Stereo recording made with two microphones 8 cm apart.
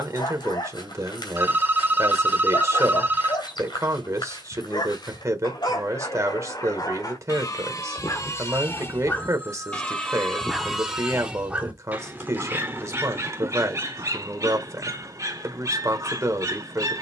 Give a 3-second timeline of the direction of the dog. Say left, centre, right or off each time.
left, left, left, centre, right, right.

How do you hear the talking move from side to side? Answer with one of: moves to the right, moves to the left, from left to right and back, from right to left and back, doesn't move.
doesn't move.